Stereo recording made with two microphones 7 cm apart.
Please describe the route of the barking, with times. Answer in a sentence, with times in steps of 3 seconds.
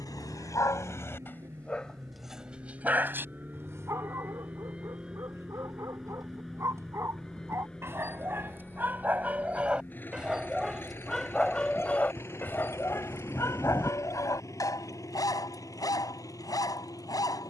You can hear the barking on the left from 0 s, on the right from 3 s, in the centre from 9 s and on the left from 12 s.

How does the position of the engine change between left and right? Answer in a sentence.
You can hear the engine travel towards the left.